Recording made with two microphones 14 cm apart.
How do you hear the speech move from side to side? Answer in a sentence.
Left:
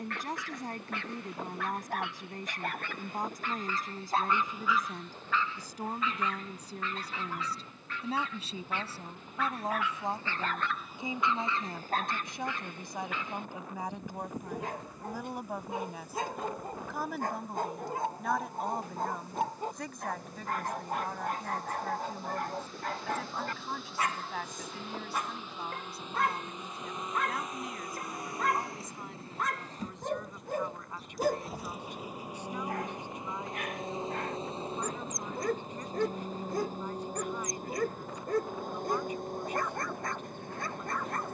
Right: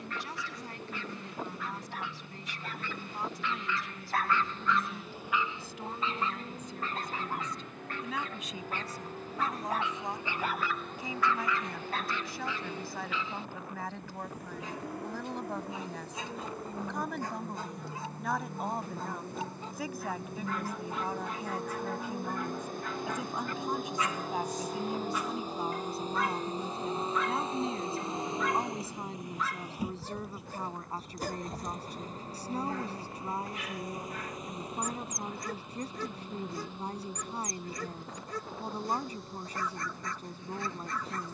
You can hear the speech move to the right.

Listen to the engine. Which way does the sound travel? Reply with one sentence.
In this clip you hear the engine move to the left.